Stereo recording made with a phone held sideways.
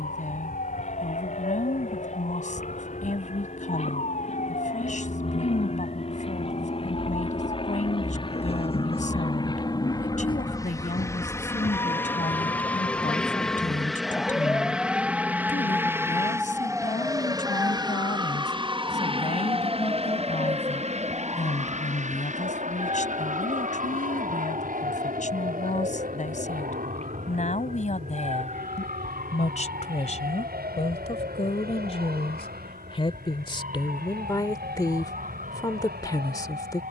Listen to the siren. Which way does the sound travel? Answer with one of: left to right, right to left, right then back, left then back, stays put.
left to right.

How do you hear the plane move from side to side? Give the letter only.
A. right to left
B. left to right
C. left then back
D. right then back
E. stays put
B.